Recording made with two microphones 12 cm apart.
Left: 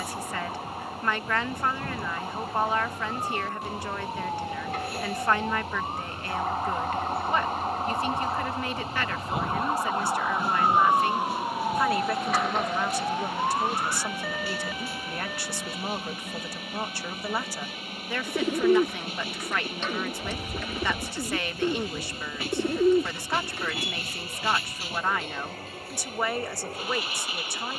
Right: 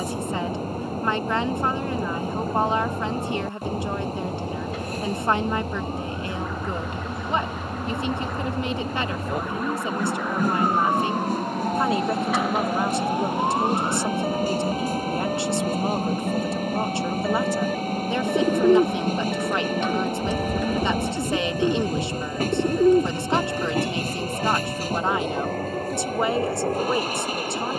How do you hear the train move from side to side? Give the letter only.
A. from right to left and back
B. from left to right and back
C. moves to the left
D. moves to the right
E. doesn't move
E.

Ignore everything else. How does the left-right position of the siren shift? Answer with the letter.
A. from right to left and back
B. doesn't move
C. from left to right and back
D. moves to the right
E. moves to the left
D.